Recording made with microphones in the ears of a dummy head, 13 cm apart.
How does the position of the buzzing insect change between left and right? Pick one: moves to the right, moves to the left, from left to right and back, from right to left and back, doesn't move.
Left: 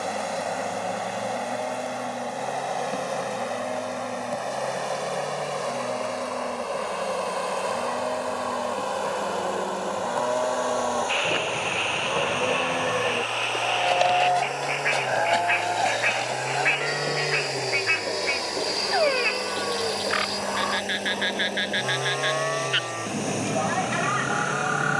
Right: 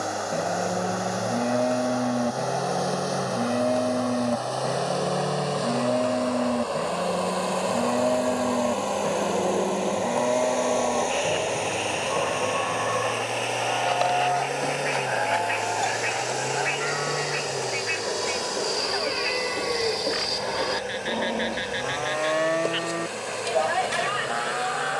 moves to the right.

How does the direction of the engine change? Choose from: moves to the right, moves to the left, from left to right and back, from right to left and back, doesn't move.
moves to the left.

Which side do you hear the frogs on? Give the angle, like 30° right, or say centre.
70° left.